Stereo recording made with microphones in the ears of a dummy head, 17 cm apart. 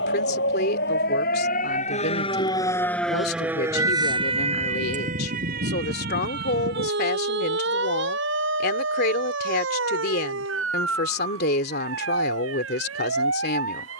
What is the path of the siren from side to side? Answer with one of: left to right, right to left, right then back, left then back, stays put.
left to right.